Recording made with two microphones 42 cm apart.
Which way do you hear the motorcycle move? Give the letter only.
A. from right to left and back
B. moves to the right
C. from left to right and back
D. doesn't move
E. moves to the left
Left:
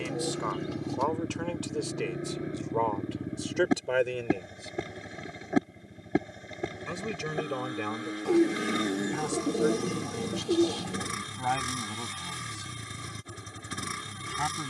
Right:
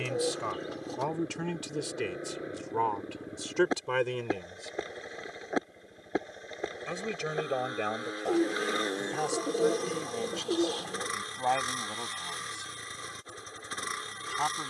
D.